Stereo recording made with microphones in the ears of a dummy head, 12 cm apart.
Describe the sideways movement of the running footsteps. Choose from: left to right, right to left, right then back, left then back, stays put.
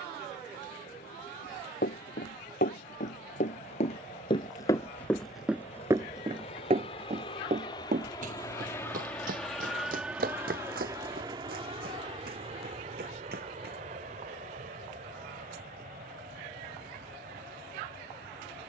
left to right.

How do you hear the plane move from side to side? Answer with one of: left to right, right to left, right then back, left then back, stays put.
left to right.